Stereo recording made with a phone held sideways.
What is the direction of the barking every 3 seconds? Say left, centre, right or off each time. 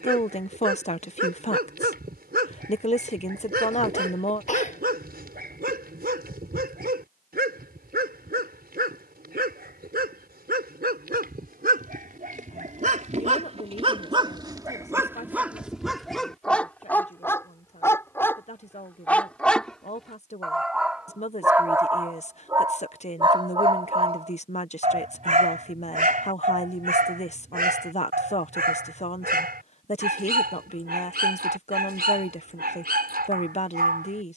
right, right, right, right, right, centre, centre, right, right, right, right, right.